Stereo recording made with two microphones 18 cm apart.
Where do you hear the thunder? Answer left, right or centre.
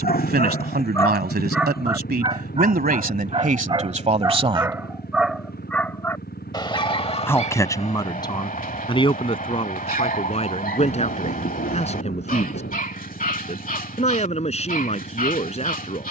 left.